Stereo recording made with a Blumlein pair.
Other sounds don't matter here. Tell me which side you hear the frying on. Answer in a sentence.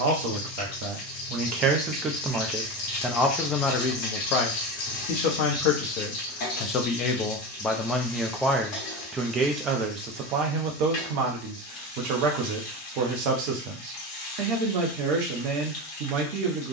In this clip you hear the frying on the left.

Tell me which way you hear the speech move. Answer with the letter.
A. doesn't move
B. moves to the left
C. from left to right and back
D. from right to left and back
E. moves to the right
D.